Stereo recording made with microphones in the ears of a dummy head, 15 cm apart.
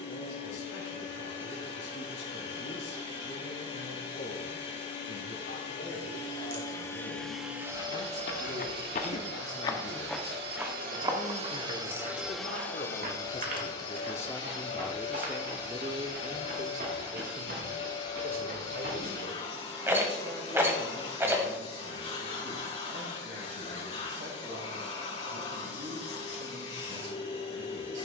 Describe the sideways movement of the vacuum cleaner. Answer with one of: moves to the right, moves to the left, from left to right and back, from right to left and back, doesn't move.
from left to right and back.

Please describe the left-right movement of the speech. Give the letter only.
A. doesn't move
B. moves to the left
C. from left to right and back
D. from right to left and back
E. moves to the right
E.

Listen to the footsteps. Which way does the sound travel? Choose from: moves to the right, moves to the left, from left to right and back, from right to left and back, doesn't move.
moves to the right.